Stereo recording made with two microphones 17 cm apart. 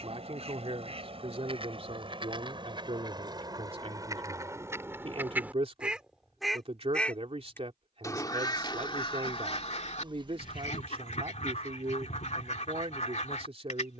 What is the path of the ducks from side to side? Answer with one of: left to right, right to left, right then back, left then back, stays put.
right to left.